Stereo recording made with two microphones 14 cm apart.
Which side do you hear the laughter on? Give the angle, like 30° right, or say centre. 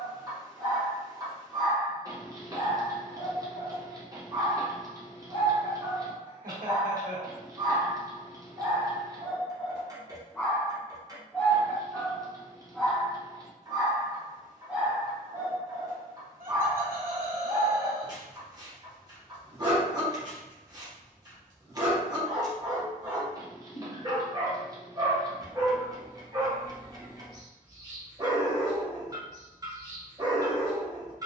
80° right.